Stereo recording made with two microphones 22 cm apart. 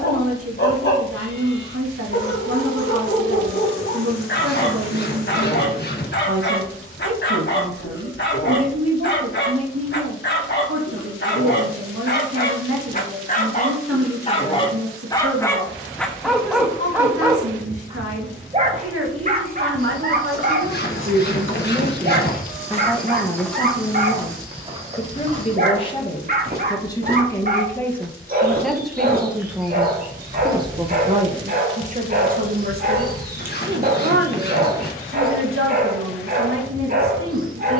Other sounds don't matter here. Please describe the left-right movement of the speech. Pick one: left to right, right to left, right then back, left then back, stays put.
left then back.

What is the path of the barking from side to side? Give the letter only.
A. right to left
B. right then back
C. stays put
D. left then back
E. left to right
E.